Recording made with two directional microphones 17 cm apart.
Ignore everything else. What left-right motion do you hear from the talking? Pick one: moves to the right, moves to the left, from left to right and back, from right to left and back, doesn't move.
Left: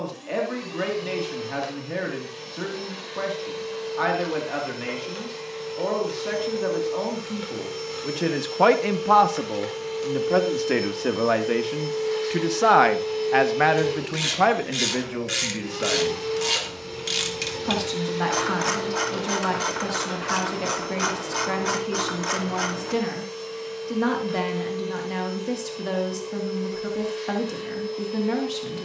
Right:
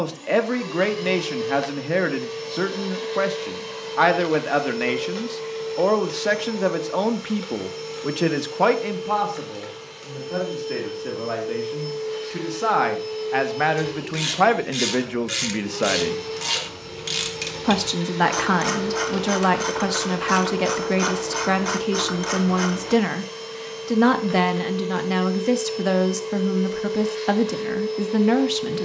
from right to left and back.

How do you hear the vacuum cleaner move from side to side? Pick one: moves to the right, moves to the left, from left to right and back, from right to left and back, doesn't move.
from right to left and back.